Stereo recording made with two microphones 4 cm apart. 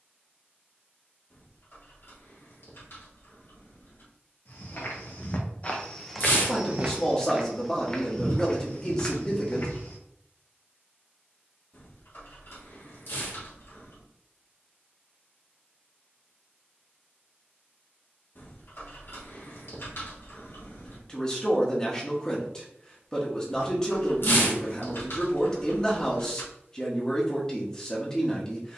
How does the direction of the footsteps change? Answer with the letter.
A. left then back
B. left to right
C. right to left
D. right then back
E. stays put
D.